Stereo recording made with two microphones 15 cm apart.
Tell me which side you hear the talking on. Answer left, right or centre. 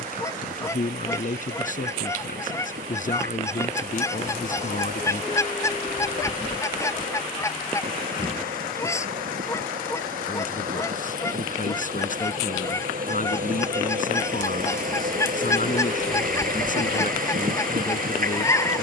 left.